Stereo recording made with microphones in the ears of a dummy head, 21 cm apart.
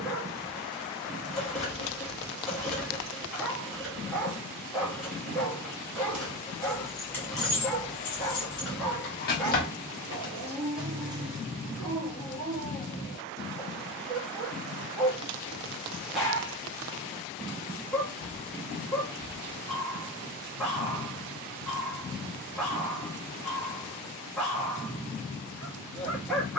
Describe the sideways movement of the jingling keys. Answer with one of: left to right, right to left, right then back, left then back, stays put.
left then back.